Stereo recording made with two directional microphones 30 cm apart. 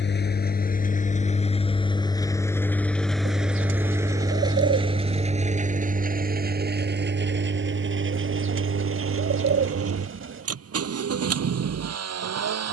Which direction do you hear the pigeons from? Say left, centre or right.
right.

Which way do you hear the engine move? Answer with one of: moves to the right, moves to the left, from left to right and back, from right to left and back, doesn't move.
moves to the right.